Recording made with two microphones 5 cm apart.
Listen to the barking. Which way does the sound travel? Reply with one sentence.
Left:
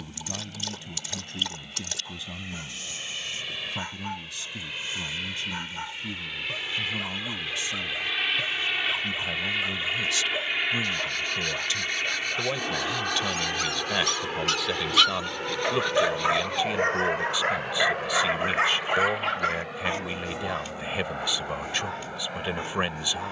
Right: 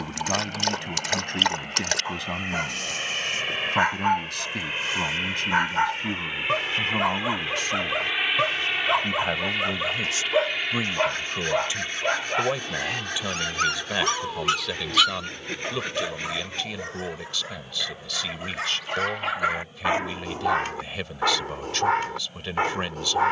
In this clip you hear the barking move from right to left and back again.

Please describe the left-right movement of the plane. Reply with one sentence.
In this clip you hear the plane move from right to left.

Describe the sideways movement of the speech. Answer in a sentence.
You can hear the speech go from the right side to the left.